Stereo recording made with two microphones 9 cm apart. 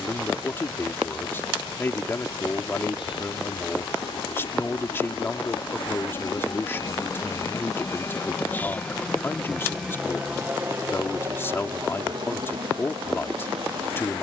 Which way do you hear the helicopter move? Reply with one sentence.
In this clip you hear the helicopter travel towards the right.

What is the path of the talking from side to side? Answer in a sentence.
You can hear the talking stay put.